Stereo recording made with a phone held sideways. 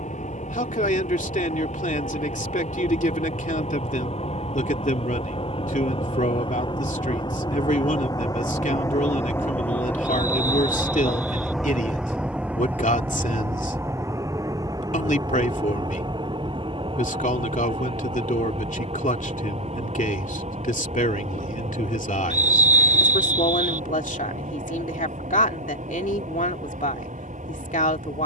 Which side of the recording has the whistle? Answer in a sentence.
You can hear the whistle on the right.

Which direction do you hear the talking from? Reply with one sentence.
In this clip you hear the talking on the left.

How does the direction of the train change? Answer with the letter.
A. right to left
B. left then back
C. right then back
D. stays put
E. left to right
E.